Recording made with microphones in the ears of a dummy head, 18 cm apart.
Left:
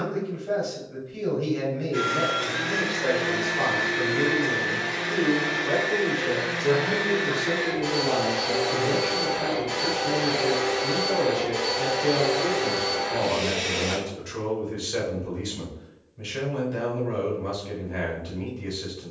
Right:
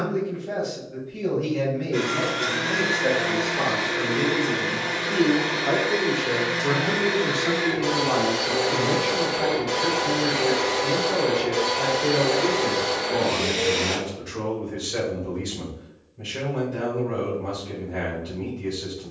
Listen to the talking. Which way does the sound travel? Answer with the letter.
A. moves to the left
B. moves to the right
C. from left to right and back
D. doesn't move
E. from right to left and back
C.